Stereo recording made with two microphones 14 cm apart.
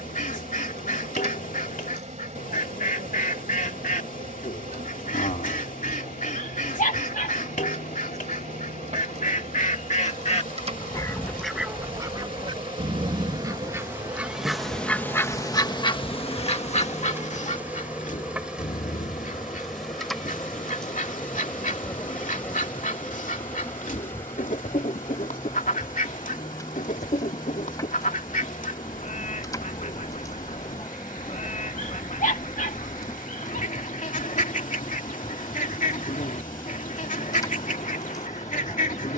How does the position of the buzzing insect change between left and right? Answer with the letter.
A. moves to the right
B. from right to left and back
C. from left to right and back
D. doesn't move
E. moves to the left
E.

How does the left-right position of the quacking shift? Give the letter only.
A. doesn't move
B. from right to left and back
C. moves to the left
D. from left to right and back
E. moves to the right
D.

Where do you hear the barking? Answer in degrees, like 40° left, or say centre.
70° left.